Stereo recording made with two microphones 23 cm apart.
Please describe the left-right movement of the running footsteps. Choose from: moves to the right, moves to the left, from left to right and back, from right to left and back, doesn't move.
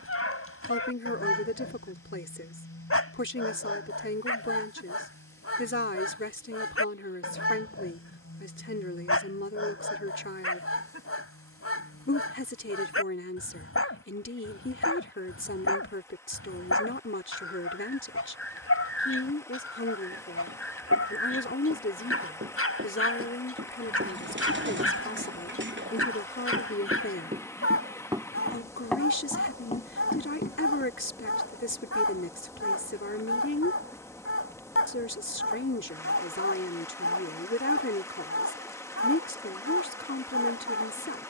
moves to the left.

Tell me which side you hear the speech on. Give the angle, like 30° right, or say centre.
60° left.